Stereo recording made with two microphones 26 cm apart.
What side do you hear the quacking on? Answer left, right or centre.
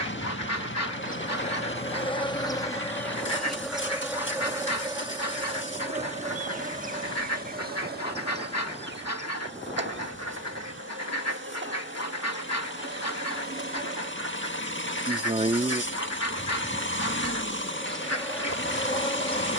left.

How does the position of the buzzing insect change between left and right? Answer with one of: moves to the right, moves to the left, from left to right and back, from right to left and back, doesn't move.
from left to right and back.